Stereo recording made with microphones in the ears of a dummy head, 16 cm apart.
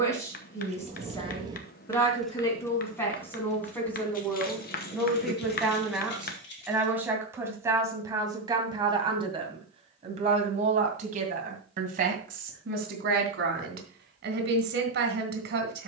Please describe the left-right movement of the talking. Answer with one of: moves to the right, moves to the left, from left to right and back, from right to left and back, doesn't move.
moves to the right.